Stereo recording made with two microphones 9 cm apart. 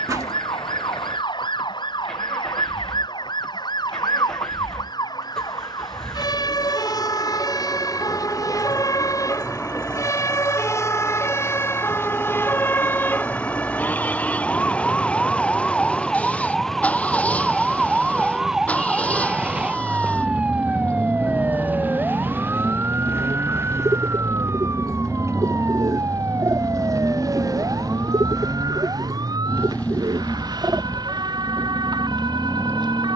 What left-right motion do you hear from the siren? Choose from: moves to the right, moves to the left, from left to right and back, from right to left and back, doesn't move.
moves to the right.